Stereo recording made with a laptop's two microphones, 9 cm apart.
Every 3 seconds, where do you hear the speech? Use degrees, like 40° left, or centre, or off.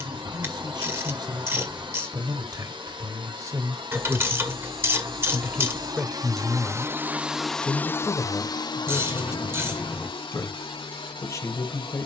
50° right, 20° right, 20° left, 40° left.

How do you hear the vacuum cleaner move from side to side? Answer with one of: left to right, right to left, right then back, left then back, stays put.
right to left.